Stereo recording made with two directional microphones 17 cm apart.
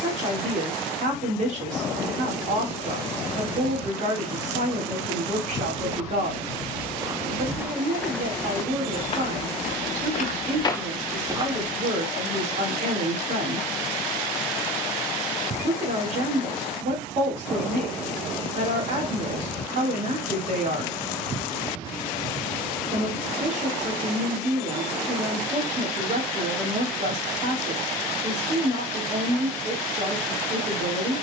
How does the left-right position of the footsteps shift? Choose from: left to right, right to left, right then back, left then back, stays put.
left then back.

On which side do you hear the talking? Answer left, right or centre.
right.